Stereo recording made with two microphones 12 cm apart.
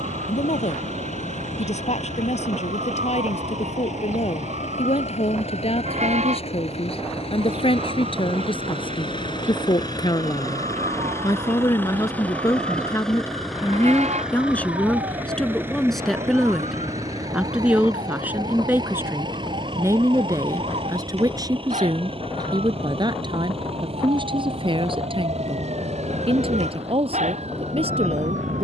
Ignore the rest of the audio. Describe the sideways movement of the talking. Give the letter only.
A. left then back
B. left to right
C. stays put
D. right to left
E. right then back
B.